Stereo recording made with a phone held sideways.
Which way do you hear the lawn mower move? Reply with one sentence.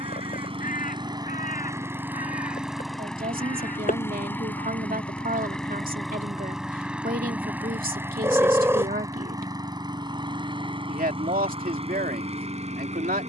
In this clip you hear the lawn mower move from right to left and back again.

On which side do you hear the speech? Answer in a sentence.
You can hear the speech on the right.